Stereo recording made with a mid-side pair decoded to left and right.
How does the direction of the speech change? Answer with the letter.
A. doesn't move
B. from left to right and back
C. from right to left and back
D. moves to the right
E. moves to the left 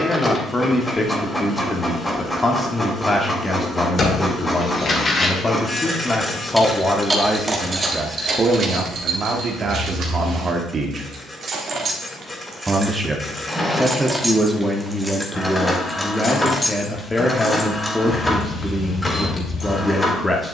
B.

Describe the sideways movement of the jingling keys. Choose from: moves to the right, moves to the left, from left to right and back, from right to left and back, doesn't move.
from left to right and back.